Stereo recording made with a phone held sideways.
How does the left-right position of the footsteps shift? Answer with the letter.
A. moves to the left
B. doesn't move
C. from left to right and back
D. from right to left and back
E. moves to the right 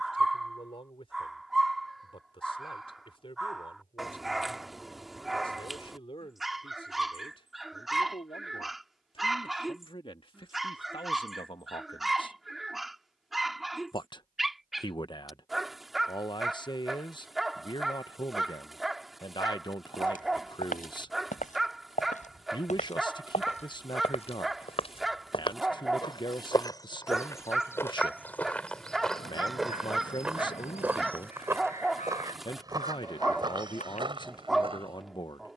E.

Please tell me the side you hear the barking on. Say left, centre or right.
centre.